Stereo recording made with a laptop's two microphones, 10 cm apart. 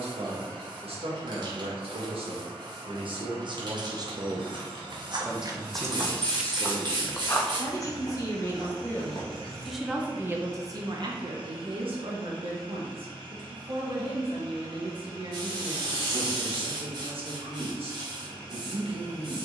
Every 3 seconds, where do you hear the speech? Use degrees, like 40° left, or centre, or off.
70° right, 30° right, 30° left, 30° right, 70° right, 70° right, 70° right.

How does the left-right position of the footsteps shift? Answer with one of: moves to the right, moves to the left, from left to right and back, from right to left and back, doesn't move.
moves to the left.